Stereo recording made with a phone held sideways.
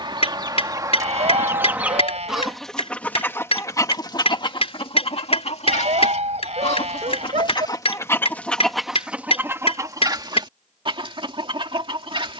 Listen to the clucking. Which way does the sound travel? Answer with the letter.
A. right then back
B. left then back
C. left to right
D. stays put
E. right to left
B.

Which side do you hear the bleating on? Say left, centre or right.
right.